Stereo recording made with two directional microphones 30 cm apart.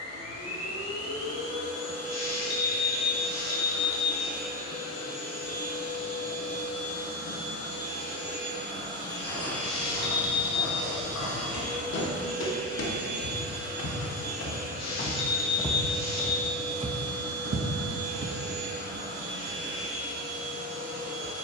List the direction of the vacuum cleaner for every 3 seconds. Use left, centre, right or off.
left, left, left, centre, right, right, right.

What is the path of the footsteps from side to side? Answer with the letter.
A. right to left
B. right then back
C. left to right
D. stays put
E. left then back
C.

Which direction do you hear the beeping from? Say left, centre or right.
left.